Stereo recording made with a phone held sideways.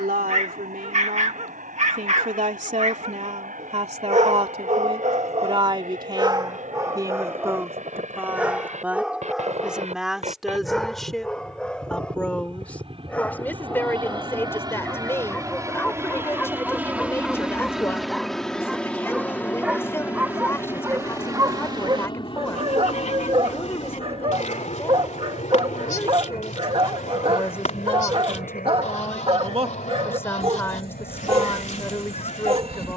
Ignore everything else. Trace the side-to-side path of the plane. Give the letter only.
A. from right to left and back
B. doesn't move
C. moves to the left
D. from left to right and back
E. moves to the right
C.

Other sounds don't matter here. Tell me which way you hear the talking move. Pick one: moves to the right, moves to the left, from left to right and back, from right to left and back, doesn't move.
moves to the left.